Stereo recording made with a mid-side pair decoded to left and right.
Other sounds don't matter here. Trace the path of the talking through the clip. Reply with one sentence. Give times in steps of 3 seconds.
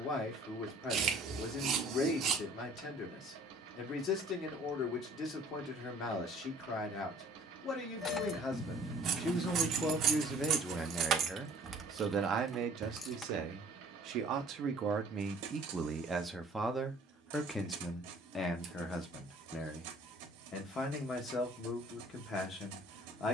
You can hear the talking on the left from 0 s, in the centre from 9 s, on the right from 12 s, in the centre from 15 s and on the left from 18 s.